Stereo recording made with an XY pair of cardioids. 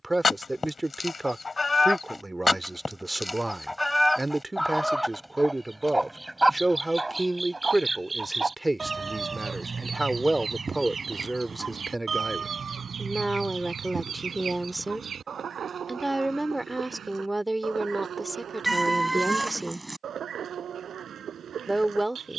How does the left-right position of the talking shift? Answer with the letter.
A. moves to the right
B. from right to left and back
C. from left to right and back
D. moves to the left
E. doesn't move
E.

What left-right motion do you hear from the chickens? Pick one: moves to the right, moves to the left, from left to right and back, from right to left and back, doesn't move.
moves to the right.